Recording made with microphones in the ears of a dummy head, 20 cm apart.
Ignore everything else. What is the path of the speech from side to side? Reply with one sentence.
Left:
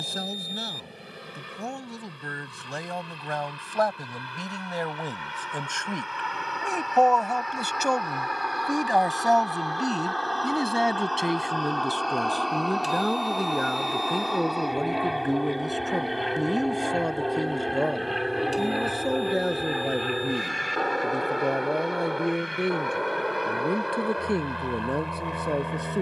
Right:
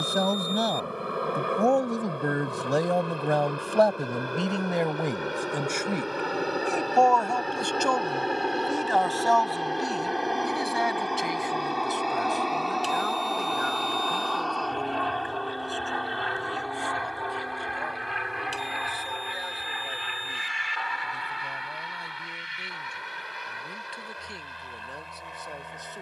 In this clip you hear the speech move to the left.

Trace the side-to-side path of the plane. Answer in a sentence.
In this clip you hear the plane travel towards the left.